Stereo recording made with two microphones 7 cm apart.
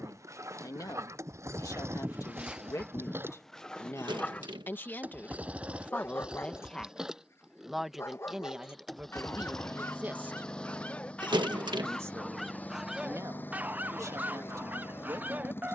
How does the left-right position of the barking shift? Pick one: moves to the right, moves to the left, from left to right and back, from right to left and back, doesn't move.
from right to left and back.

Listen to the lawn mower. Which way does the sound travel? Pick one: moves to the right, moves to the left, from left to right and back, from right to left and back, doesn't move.
moves to the left.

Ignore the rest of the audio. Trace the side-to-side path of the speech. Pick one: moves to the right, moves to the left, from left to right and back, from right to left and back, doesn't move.
moves to the right.